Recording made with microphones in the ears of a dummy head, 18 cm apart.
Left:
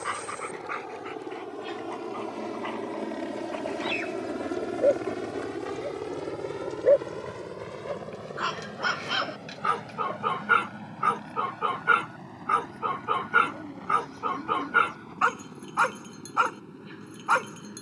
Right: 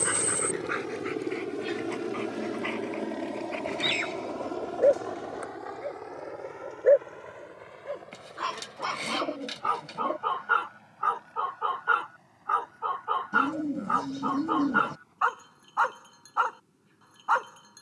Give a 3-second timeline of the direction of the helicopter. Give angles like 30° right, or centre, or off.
30° right, 20° left, 50° left, 70° left, 80° left, 80° left.